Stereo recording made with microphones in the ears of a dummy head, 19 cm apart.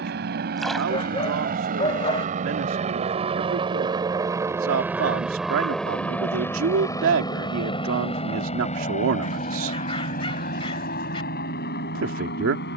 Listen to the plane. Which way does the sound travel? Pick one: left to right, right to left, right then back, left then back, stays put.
right to left.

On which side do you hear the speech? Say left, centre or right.
right.